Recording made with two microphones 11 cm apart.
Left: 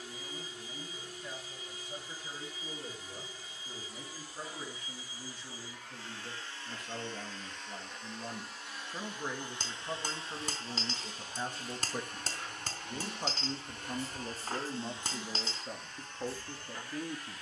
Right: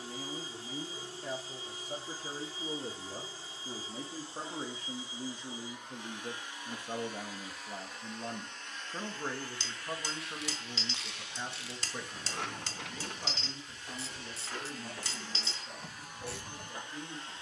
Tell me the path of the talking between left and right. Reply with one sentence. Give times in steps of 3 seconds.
You can hear the talking on the right from 0 s, in the centre from 9 s and on the left from 12 s.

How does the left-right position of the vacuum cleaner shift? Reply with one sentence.
You can hear the vacuum cleaner go left and come back.